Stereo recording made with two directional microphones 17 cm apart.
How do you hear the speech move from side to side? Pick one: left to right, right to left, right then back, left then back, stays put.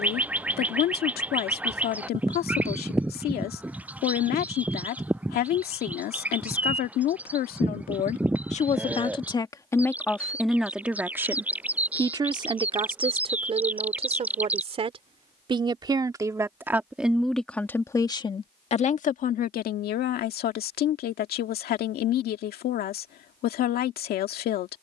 right then back.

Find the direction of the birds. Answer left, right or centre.
centre.